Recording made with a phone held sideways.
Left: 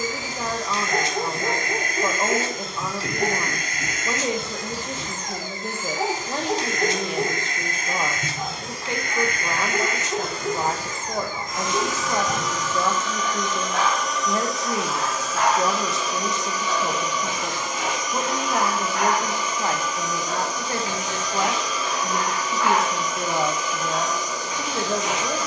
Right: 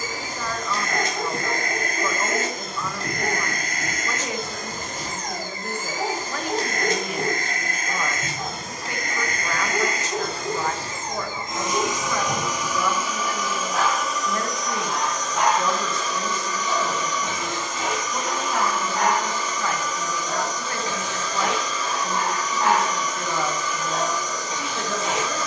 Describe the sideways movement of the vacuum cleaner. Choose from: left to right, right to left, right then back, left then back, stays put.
right to left.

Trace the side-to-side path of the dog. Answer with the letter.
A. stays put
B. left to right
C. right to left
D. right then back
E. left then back
B.